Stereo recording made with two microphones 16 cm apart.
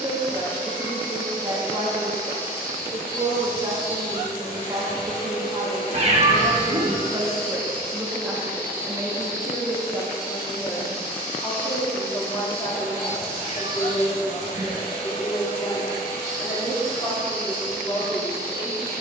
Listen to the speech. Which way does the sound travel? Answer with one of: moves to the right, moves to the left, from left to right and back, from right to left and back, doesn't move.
moves to the left.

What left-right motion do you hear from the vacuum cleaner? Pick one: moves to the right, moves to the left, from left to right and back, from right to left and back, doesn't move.
doesn't move.